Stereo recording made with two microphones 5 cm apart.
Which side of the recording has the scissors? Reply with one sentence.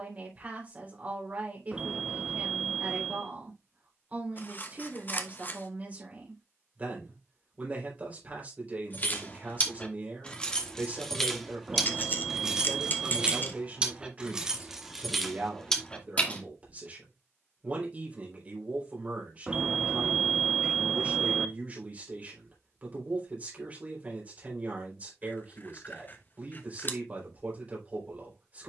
In this clip you hear the scissors on the left.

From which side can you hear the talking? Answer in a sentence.
You can hear the talking on the right.